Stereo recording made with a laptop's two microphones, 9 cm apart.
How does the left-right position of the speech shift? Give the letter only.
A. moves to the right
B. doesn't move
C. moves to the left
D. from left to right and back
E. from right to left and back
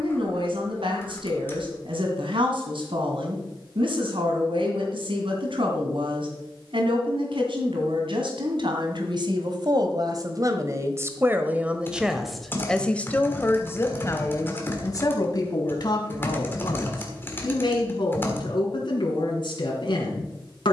C.